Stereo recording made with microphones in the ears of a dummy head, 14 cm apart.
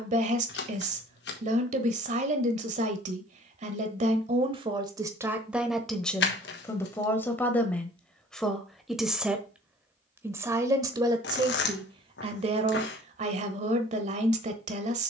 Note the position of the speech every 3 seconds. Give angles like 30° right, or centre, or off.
40° right, 30° right, 10° left, 20° right, 40° right.